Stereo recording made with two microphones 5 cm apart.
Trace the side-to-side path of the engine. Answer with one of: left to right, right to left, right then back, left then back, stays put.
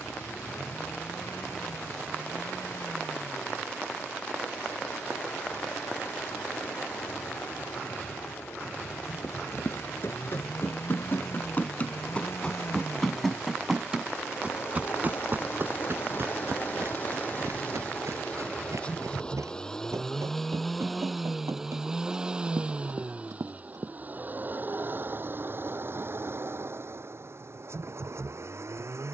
left to right.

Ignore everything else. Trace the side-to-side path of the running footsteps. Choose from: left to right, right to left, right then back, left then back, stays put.
left to right.